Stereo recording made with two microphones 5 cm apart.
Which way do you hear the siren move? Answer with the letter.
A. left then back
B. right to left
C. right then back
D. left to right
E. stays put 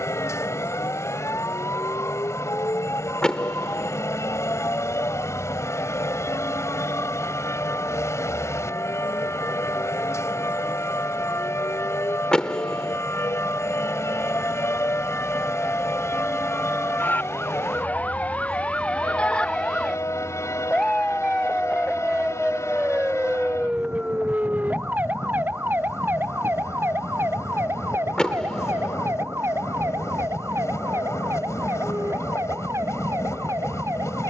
D.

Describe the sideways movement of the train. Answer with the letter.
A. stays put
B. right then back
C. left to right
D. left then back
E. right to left
A.